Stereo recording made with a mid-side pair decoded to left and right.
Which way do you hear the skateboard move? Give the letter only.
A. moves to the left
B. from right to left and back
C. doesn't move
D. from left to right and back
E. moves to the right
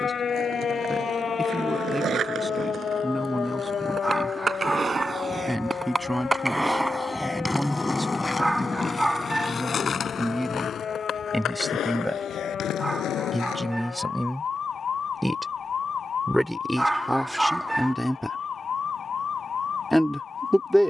A.